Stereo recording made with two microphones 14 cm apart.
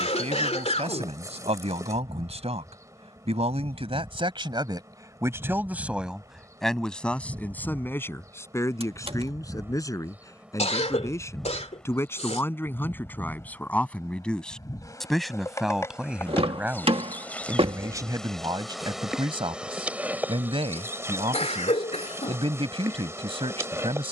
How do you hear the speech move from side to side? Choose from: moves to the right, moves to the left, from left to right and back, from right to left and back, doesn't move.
from right to left and back.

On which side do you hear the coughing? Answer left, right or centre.
left.